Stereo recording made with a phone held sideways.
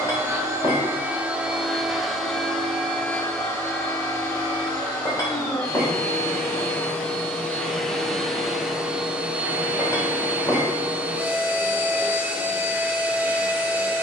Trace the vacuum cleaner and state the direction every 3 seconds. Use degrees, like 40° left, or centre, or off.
10° right, 20° left, 10° left, 10° right, 10° right.